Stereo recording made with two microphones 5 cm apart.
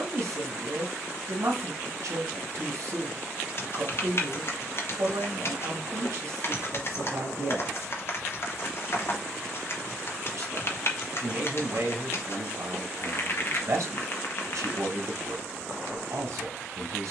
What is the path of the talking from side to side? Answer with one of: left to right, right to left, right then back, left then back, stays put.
stays put.